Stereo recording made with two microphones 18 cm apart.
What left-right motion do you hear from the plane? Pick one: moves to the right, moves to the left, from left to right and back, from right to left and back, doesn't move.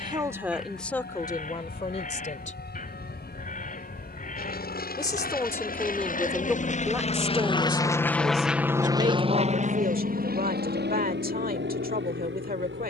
moves to the right.